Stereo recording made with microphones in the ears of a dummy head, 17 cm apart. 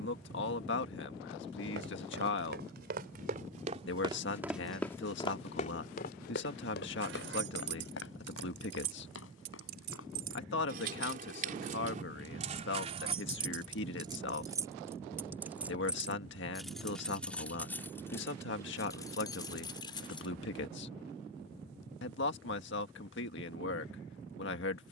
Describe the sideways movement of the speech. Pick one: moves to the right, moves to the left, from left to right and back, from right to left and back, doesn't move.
doesn't move.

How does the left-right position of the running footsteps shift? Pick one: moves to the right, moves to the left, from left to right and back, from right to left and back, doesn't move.
moves to the left.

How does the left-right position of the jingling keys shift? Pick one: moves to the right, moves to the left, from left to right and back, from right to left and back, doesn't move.
moves to the left.